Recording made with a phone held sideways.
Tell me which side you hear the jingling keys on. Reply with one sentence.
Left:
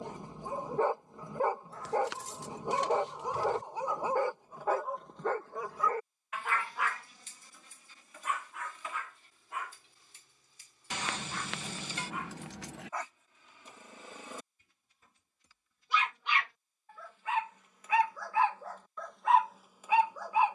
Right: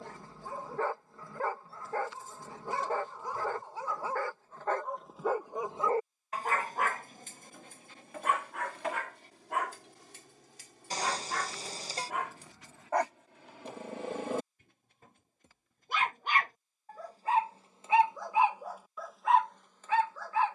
In this clip you hear the jingling keys on the left.